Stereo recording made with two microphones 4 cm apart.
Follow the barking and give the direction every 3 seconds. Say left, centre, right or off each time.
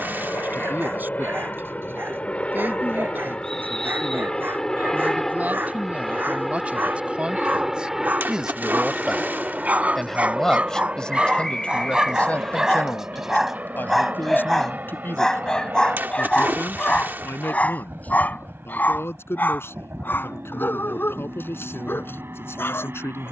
right, right, right, right, centre, left, left, left.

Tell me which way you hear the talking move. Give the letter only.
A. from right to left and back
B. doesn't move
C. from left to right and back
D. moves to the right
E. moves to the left
E.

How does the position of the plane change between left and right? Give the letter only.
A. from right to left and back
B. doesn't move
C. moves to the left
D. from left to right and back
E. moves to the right
E.